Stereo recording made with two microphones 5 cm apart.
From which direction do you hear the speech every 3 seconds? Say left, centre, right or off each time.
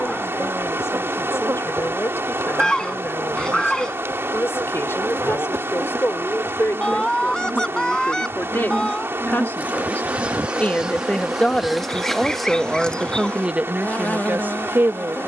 left, left, left, left, right.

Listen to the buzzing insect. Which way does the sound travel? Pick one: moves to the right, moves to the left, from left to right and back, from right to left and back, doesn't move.
moves to the left.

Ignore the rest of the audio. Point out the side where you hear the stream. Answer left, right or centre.
right.